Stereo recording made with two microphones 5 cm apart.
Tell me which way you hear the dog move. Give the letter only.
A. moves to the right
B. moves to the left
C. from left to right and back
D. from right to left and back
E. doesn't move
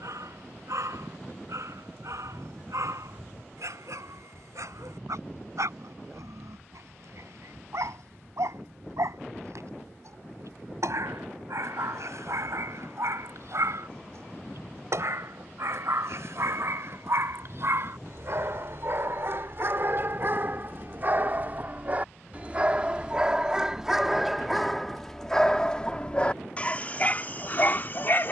B.